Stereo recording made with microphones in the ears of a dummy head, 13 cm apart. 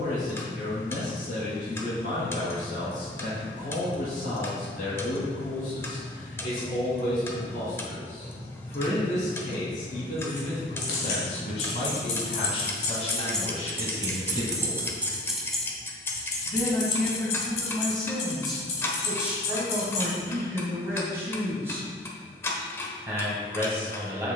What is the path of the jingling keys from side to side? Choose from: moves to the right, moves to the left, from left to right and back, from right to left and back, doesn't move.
from left to right and back.